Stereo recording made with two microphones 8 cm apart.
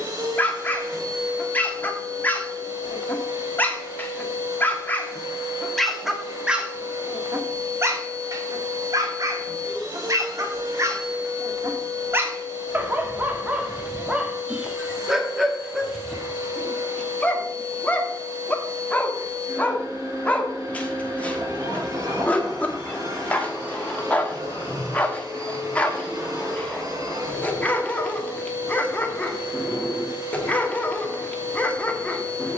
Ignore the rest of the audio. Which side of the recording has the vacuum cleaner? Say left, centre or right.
right.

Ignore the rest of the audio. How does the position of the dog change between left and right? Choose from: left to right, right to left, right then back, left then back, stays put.
right then back.